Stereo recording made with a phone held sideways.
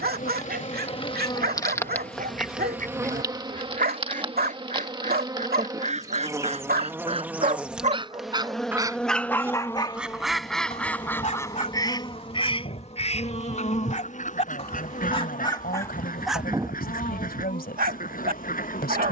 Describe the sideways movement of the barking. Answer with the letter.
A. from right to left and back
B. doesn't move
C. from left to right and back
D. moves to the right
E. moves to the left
A.